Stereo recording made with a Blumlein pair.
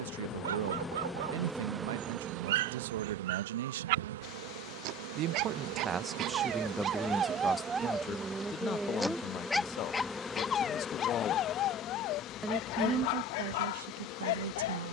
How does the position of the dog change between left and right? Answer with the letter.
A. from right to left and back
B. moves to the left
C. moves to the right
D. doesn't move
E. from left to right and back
B.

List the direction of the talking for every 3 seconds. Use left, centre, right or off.
right, right, centre, left, right.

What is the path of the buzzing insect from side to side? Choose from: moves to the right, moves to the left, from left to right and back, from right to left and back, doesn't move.
from left to right and back.